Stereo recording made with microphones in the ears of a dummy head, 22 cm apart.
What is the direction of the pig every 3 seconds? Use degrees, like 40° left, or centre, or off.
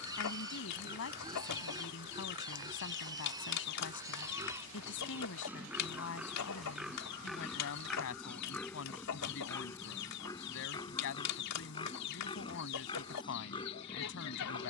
20° right, 10° right, centre, 20° left, 20° left.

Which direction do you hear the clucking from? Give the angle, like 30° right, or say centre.
80° left.